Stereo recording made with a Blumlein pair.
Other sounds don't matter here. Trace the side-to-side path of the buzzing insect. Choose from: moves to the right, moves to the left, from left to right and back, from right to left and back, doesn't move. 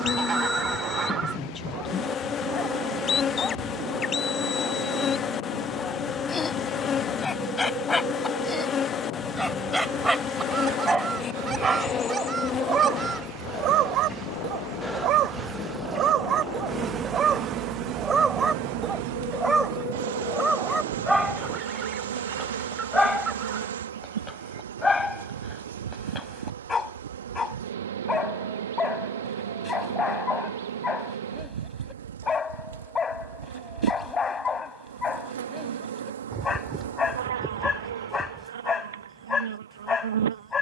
moves to the right.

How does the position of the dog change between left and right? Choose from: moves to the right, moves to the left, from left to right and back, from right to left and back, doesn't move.
from left to right and back.